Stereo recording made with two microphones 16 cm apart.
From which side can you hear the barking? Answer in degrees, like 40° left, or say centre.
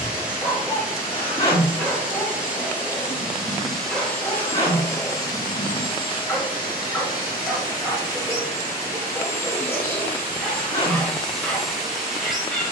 10° left.